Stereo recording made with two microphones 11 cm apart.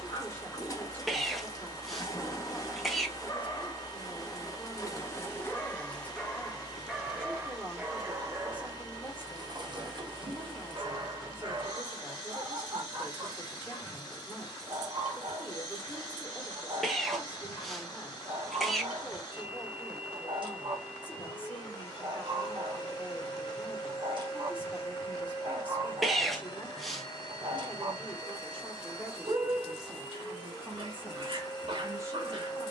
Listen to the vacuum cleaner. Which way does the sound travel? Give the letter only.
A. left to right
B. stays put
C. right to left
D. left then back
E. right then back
B.